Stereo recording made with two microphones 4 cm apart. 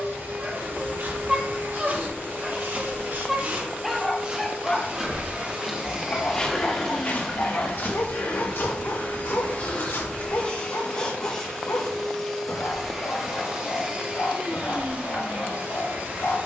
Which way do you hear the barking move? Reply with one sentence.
You can hear the barking travel towards the left.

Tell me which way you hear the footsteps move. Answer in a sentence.
You can hear the footsteps go from the right side to the left.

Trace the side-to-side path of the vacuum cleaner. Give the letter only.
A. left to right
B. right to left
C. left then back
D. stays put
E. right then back
C.